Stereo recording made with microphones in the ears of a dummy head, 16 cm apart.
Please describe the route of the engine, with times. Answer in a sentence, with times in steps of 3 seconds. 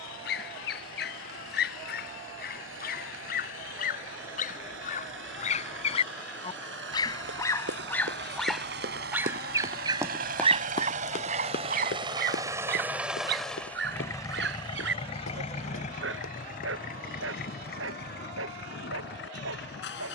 You can hear the engine on the right from 0 s, in the centre from 12 s and on the left from 15 s.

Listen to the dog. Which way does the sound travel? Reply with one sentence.
You can hear the dog move from left to right.